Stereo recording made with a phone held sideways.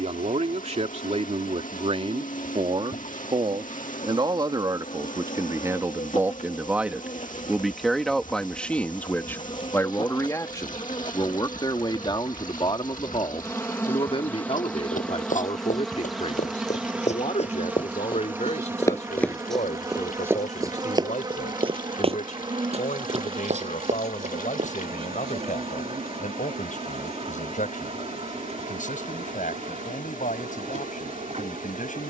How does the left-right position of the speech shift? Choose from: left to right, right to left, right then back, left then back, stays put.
right to left.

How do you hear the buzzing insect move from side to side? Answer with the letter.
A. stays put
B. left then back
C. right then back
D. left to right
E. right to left
D.